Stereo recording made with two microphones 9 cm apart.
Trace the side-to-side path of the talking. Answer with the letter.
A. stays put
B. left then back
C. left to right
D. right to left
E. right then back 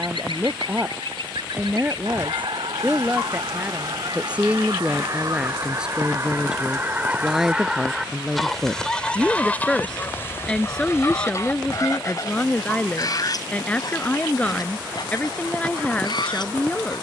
D.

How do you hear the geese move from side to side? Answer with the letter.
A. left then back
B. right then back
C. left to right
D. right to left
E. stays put
D.